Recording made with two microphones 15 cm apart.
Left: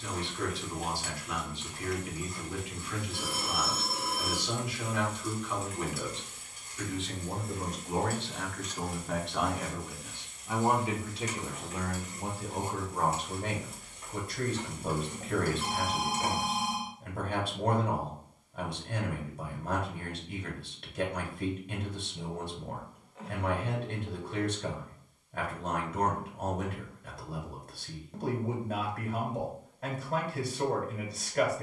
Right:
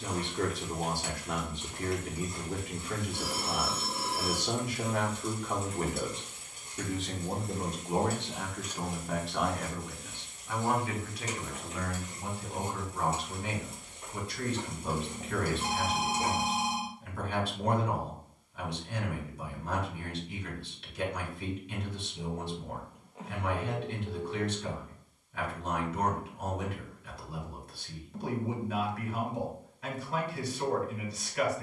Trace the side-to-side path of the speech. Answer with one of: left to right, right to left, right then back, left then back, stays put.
right to left.